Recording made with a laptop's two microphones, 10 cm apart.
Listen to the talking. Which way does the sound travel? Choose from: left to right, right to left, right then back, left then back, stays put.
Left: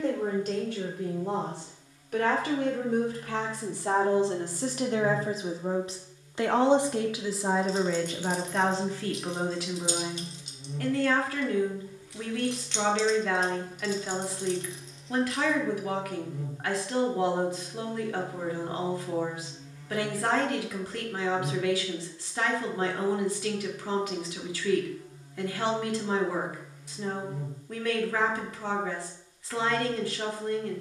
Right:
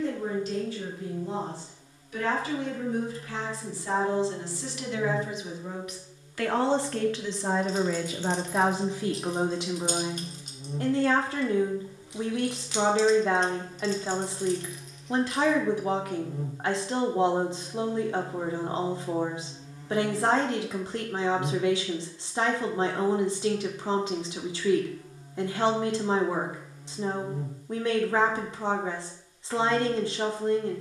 left to right.